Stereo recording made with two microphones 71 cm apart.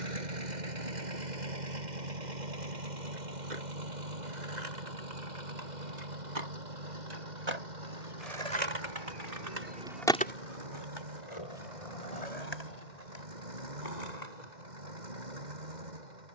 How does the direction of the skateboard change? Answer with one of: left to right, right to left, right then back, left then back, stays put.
right to left.